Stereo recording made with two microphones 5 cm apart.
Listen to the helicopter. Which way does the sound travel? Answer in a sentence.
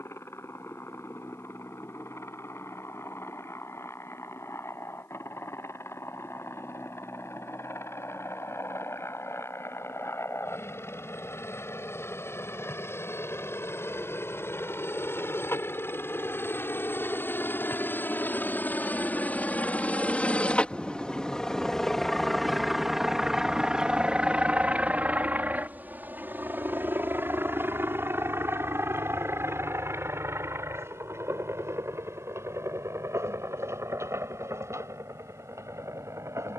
You can hear the helicopter go from the left side to the right.